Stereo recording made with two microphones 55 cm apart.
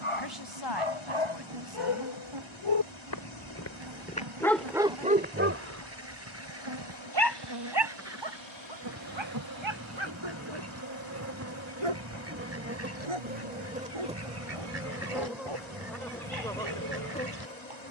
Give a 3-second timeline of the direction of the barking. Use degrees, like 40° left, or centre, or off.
70° left, centre, 50° right, 60° right, 70° right, 70° right.